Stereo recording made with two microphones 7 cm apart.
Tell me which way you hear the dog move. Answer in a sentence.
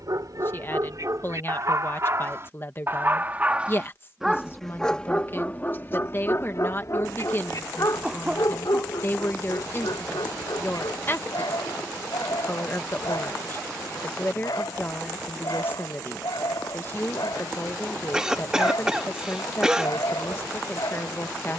In this clip you hear the dog go from the right side to the left.